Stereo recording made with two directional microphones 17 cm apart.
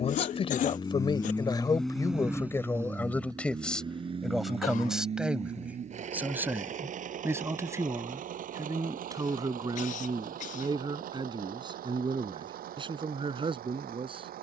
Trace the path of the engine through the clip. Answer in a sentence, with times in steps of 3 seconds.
In this clip you hear the engine in the centre from 0 s and on the right from 3 s.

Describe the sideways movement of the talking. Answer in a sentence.
You can hear the talking travel towards the right.